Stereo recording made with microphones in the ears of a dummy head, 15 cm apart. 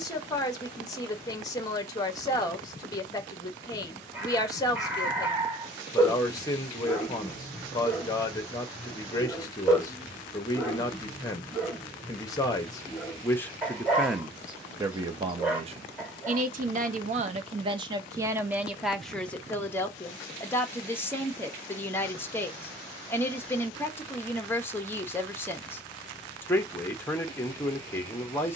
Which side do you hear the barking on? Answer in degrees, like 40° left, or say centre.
10° right.